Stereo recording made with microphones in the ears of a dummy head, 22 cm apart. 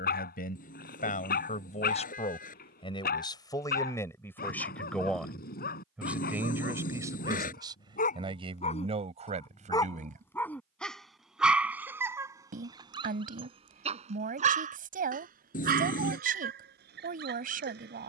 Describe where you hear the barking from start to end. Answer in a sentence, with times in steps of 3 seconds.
In this clip you hear the barking on the left from 0 s, in the centre from 9 s and on the right from 12 s.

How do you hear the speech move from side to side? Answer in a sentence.
In this clip you hear the speech go from the left side to the right.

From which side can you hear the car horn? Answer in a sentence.
You can hear the car horn on the left.